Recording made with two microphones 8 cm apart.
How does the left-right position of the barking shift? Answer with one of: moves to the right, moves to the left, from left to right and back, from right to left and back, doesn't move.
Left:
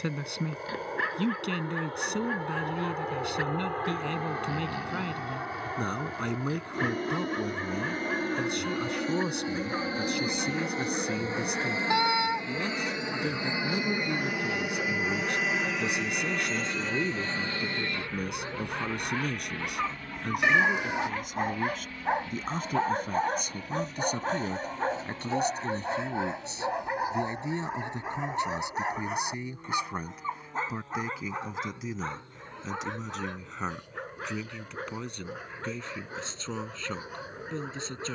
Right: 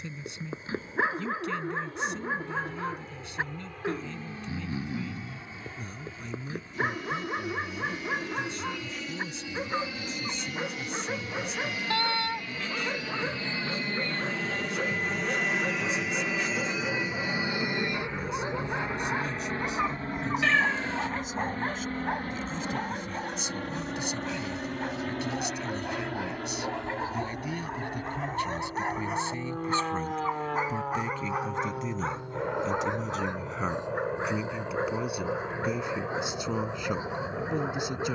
from right to left and back.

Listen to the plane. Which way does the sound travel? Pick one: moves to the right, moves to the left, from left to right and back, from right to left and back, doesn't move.
moves to the right.